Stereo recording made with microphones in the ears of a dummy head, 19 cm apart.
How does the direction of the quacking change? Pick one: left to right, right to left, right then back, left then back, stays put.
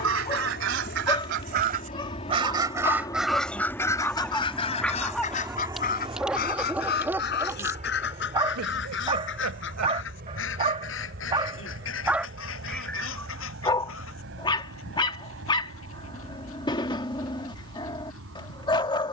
right to left.